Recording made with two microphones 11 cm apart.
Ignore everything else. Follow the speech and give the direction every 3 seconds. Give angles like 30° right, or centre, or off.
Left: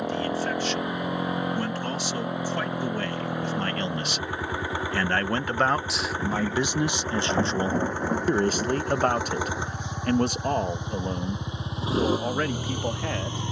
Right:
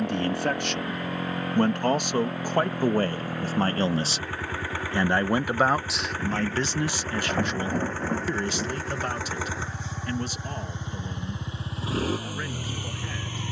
50° right, 20° right, 30° left, 60° left, 70° left.